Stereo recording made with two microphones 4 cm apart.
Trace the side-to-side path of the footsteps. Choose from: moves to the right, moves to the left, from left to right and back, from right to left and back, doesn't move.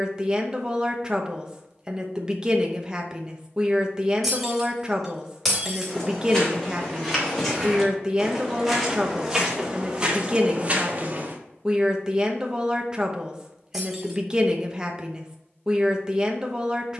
moves to the right.